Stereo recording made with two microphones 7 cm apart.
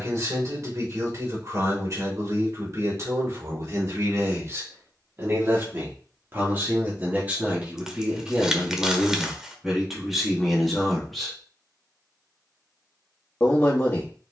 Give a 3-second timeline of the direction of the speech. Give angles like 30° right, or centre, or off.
40° right, 40° right, 20° right, centre, 20° left.